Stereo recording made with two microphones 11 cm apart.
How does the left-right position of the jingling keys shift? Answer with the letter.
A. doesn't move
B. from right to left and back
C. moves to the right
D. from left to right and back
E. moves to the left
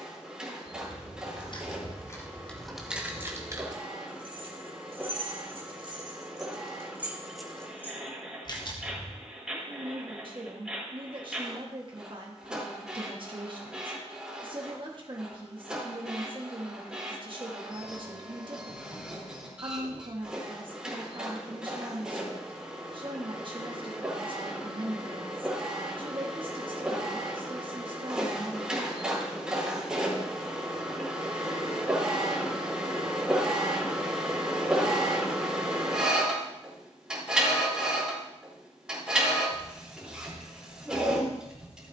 D.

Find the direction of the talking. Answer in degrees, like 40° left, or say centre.
50° right.